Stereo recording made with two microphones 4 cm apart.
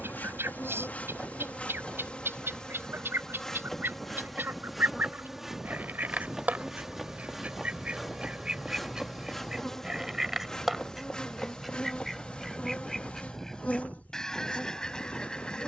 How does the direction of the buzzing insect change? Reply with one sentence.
In this clip you hear the buzzing insect go right and come back.